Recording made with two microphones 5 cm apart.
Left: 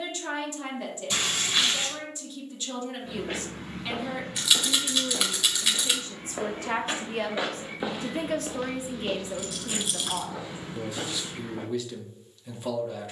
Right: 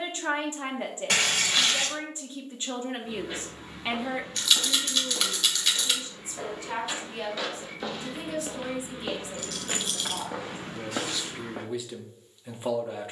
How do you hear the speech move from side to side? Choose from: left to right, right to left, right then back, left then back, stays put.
left then back.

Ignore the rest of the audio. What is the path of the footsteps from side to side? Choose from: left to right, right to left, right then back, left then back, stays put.
left to right.